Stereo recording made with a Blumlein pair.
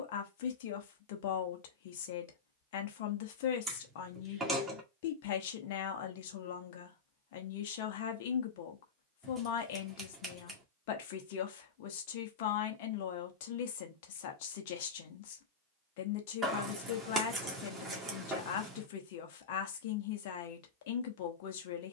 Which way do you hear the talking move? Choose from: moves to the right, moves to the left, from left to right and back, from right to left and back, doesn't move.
doesn't move.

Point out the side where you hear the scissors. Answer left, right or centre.
centre.